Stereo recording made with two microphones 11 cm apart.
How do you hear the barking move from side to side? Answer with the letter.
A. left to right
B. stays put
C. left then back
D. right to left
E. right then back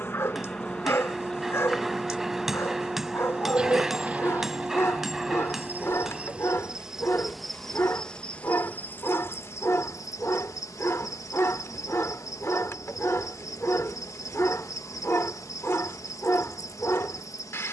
B.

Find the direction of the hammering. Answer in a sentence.
In this clip you hear the hammering in the centre.